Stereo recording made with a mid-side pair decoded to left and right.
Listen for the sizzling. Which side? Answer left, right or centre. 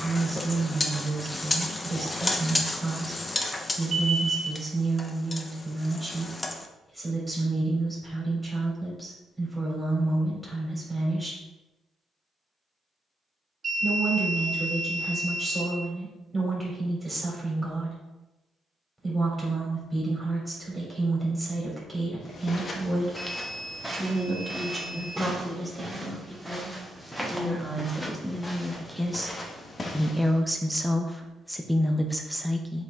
left.